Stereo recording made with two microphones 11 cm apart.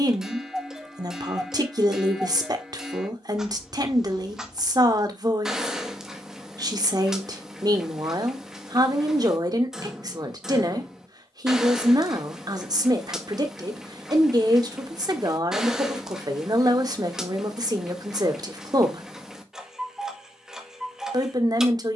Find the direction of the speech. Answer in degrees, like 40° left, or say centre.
40° right.